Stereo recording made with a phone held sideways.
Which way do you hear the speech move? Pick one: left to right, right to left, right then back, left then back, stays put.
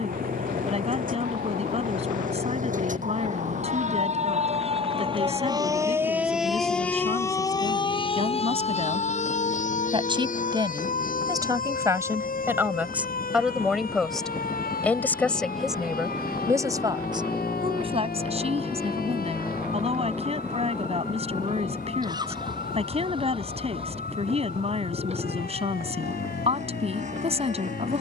left then back.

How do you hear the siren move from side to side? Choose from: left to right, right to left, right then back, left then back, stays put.
right to left.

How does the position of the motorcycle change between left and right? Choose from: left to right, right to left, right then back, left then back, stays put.
left to right.